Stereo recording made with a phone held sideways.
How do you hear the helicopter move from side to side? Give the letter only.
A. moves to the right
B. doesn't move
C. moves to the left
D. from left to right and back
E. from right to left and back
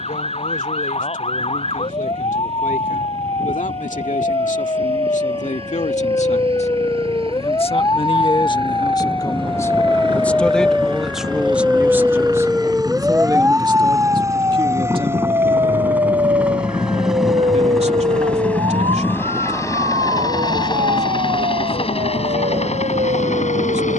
C.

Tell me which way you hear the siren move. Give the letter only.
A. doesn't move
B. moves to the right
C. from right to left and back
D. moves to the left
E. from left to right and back
B.